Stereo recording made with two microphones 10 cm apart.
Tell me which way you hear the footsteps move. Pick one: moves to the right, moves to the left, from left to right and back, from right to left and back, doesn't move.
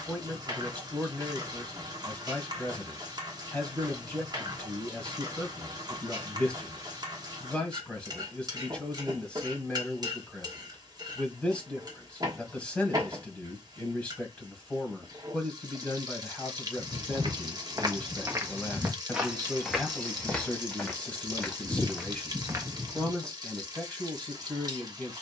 from right to left and back.